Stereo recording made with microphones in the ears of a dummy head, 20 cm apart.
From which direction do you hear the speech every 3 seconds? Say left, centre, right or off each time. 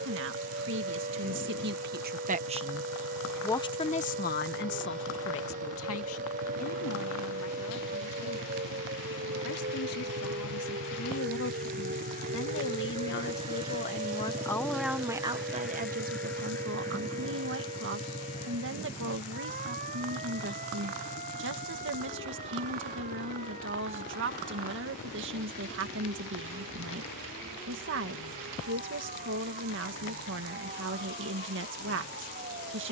right, left, left, left, left, right, right, right, right, right, right.